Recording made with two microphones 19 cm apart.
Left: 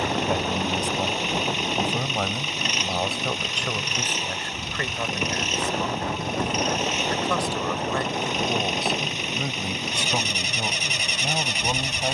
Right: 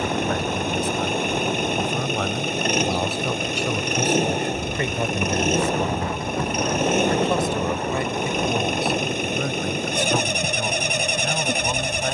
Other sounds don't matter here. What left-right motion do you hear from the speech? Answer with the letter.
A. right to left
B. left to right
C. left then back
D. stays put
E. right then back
E.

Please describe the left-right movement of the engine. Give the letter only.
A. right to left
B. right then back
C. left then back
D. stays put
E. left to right
D.